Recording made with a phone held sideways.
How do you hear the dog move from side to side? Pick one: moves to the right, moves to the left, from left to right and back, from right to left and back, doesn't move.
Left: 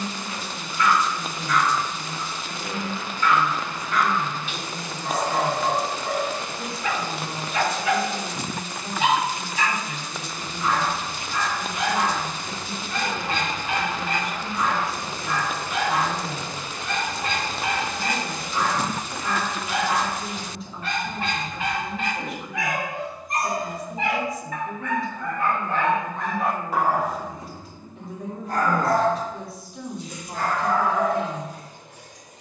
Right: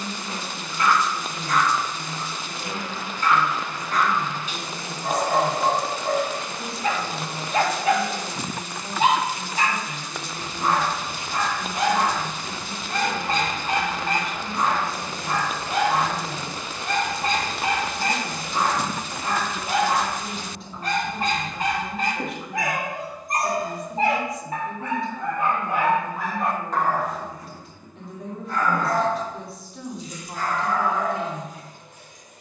moves to the left.